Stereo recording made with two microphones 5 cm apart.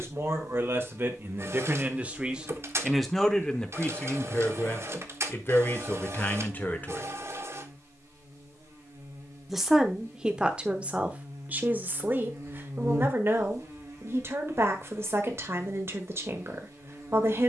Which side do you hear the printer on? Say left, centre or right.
right.